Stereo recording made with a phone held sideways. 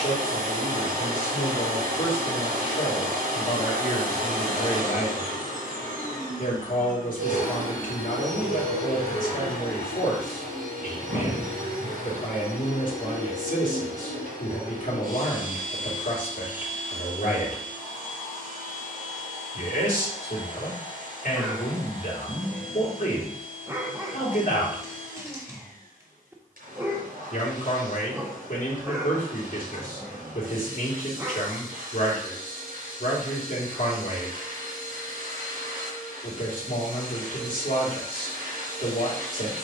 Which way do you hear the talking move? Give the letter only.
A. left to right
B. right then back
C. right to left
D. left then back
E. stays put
E.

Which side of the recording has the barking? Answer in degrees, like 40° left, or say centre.
20° right.